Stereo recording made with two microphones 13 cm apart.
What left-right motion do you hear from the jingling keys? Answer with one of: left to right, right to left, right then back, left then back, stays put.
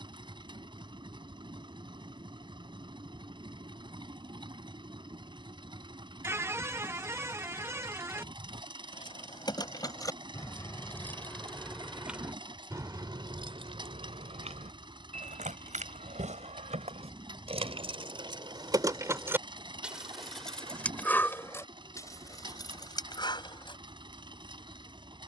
right then back.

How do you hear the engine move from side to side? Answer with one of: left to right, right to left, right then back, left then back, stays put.
stays put.